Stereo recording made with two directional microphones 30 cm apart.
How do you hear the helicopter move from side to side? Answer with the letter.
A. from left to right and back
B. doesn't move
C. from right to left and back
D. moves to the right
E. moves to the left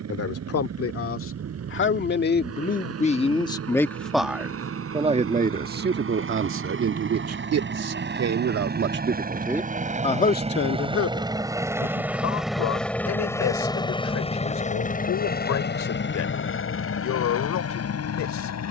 E.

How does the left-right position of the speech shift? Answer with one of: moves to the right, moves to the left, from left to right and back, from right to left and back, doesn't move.
from left to right and back.